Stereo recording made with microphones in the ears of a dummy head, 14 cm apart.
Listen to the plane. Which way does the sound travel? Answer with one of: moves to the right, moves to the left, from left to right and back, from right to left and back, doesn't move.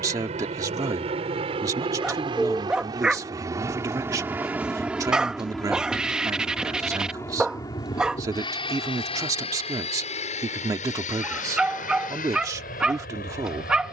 moves to the left.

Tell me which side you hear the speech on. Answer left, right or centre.
right.